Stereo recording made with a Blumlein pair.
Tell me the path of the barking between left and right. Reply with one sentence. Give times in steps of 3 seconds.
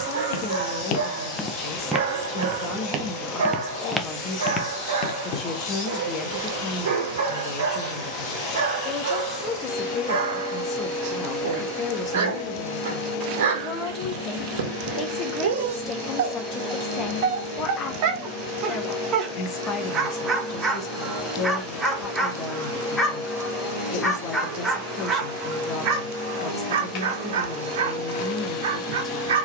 In this clip you hear the barking on the right from 0 s, in the centre from 21 s and on the right from 24 s.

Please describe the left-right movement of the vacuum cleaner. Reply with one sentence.
In this clip you hear the vacuum cleaner stay put.